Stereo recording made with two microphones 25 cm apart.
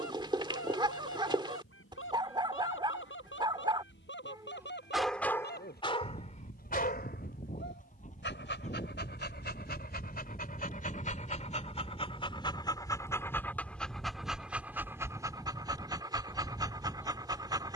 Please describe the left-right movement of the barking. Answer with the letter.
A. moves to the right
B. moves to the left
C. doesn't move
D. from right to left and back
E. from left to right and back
D.